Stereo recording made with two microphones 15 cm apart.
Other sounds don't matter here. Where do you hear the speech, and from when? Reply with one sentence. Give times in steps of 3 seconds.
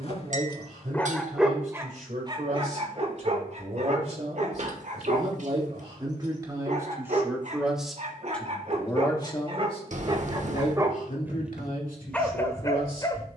You can hear the speech on the right from 0 s, in the centre from 6 s and on the left from 9 s.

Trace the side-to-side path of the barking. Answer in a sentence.
In this clip you hear the barking move from left to right and back again.